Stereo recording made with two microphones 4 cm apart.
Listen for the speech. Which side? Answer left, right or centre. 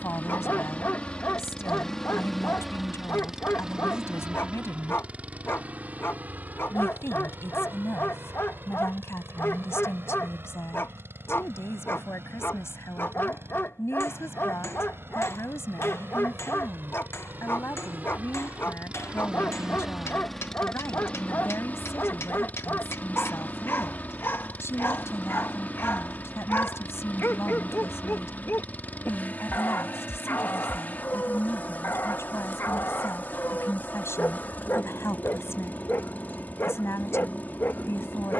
left.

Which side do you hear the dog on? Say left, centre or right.
left.